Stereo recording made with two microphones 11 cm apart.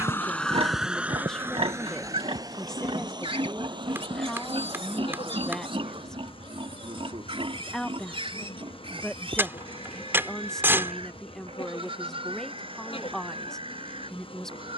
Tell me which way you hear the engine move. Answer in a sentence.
In this clip you hear the engine move to the right.